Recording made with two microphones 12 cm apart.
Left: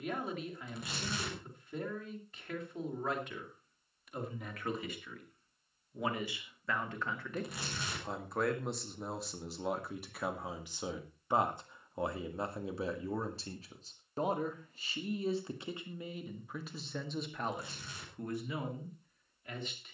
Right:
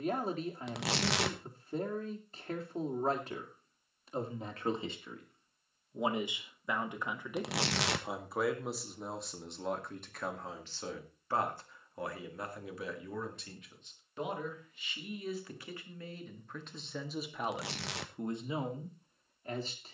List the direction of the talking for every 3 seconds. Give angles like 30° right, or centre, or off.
40° right, 30° right, 10° right, 10° left, 30° left, 10° left, 30° right.